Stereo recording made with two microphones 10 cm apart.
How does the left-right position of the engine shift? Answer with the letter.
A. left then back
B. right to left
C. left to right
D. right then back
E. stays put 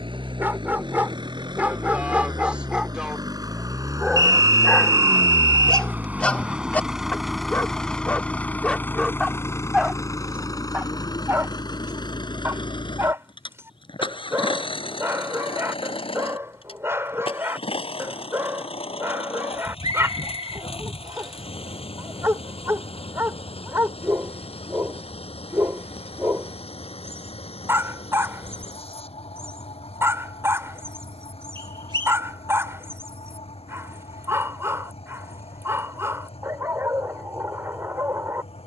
B.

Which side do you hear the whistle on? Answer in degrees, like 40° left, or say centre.
50° right.